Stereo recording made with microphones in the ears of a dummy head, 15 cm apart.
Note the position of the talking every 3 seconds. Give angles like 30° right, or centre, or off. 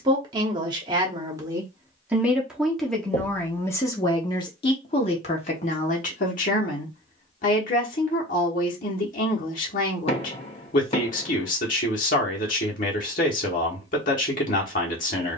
20° right, 30° left, 50° left, 50° left, 50° left.